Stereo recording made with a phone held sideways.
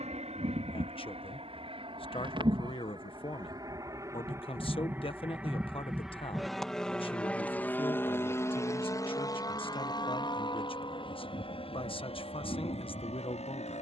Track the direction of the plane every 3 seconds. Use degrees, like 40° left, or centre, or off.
40° right, 20° right, 10° left, 30° left, 40° left.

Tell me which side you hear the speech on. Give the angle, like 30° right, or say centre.
40° left.